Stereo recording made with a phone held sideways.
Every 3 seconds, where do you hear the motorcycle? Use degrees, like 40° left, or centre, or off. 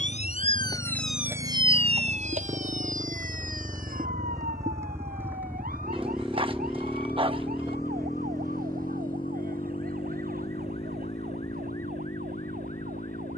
50° right, 20° right, 10° left, 40° left, 60° left.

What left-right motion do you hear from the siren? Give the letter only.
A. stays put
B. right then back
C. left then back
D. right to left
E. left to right
E.